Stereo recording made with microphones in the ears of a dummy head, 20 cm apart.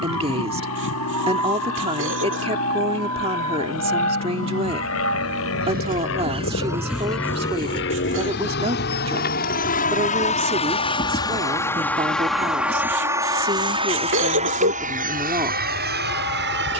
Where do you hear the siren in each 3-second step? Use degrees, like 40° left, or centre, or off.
80° right, 60° right, 10° left, 60° left, 70° left, 80° left.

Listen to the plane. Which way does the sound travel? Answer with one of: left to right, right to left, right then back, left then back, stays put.
left to right.